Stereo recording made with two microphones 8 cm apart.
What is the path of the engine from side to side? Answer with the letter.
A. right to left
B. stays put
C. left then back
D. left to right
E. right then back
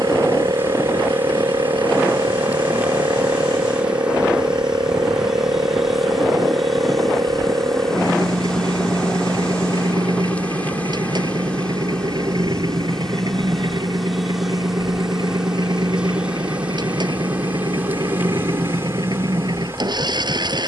B.